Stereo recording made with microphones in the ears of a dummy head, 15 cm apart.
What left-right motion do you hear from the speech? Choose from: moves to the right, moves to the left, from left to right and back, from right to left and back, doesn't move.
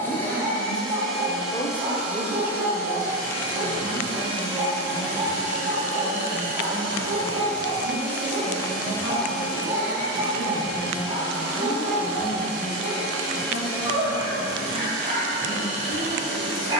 from left to right and back.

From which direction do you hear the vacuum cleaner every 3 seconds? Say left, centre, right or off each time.
centre, right, right, right, right, right.